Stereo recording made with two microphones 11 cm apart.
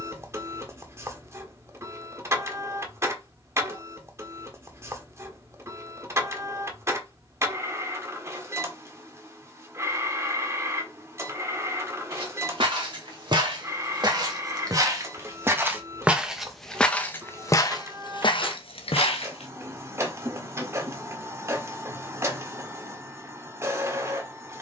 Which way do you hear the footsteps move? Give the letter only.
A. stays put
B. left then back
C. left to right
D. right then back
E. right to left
E.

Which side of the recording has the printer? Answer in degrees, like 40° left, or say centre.
30° right.